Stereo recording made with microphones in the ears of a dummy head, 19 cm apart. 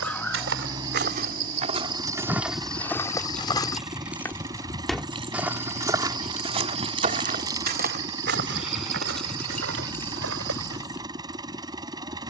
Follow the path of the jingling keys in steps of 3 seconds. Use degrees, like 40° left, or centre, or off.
10° left, 10° right, 20° right, 10° left.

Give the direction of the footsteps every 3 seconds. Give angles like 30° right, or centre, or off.
30° right, centre, 40° right, 70° right.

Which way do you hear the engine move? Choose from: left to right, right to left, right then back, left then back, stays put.
stays put.